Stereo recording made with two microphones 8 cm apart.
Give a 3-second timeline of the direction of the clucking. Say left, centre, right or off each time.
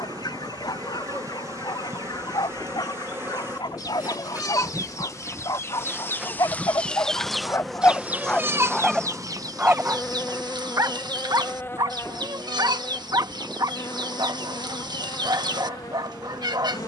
left, left, centre, right, right, right.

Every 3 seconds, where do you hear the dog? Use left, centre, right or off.
left, left, left, right, right, right.